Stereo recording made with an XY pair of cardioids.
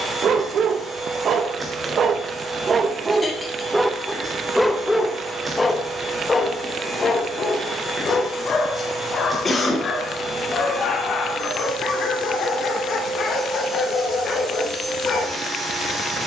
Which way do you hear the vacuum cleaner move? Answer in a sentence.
In this clip you hear the vacuum cleaner stay in one place.